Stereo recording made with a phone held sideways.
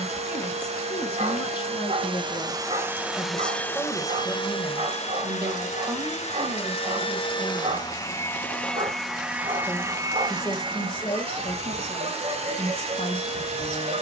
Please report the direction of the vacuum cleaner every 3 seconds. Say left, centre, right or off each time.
right, left, left, right, right.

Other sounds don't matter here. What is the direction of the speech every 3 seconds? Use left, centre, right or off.
left, centre, right, left, left.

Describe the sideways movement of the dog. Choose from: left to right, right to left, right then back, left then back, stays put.
stays put.